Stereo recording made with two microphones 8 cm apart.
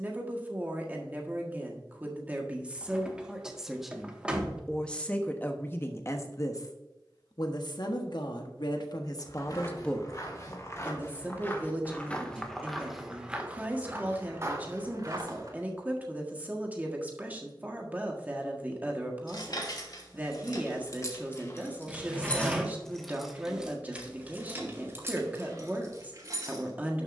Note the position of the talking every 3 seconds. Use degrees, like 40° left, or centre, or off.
20° right, 10° left, 60° left, centre, 20° right, 20° right, 20° right, 20° right, 20° right.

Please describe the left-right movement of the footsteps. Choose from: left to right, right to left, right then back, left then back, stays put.
left to right.